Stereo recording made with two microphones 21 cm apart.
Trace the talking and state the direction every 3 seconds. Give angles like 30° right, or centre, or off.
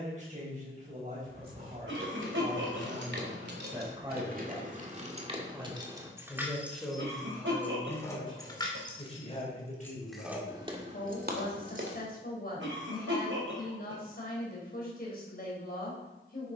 30° right, 20° right, 10° left, 40° left, 50° left, 50° left.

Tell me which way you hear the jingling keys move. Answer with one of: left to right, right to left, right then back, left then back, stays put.
left then back.